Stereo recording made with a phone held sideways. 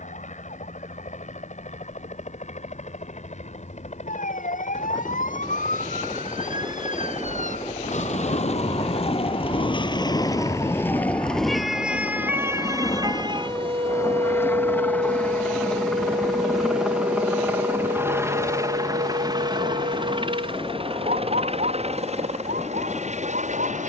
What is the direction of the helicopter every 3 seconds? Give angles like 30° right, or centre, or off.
60° left, 60° left, 50° left, 40° left, 20° left, centre, 30° right, 50° right.